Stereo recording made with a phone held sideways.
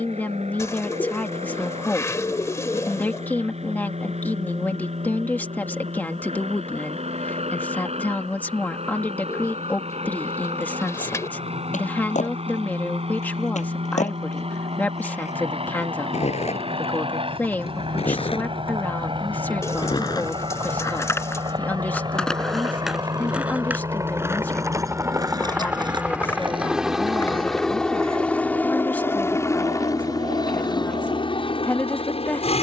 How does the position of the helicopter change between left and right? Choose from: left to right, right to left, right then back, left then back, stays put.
right to left.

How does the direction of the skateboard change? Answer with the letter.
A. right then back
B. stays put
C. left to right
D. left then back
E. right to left
C.